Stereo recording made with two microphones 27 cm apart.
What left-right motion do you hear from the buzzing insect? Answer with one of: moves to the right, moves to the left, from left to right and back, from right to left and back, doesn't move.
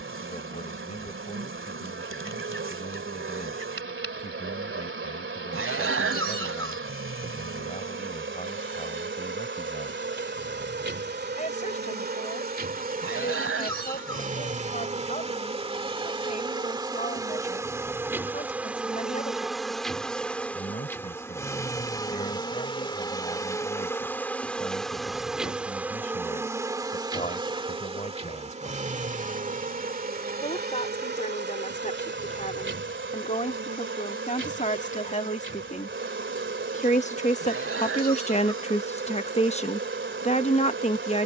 from right to left and back.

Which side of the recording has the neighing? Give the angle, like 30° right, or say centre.
50° right.